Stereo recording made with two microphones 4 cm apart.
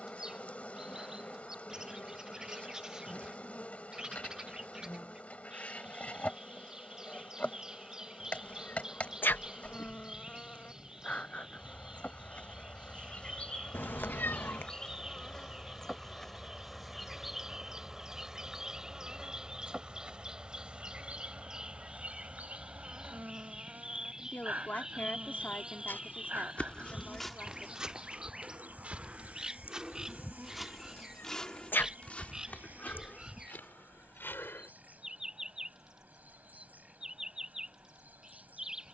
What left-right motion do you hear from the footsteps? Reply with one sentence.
You can hear the footsteps go right and come back.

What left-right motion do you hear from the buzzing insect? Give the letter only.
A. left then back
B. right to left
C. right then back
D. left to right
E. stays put
D.